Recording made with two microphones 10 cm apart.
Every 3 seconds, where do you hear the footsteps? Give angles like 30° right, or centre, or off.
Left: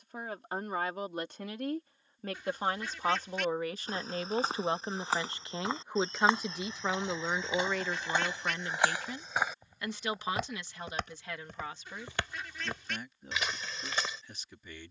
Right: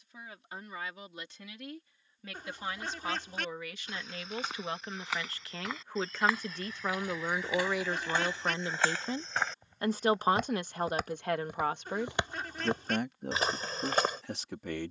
off, 30° left, 20° left, centre, 30° right.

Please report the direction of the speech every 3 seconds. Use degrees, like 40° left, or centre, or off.
50° left, 30° left, centre, 50° right, 70° right.